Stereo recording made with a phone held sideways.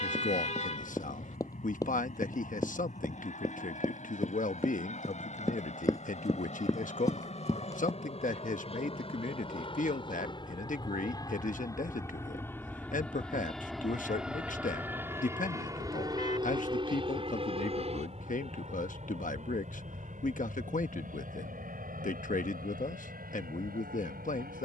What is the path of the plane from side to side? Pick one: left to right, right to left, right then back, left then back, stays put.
left to right.